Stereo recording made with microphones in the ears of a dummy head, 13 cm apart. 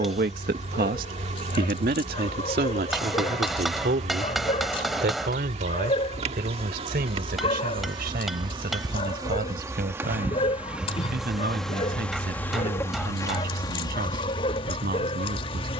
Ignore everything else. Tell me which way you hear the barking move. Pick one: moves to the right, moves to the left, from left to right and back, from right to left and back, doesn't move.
doesn't move.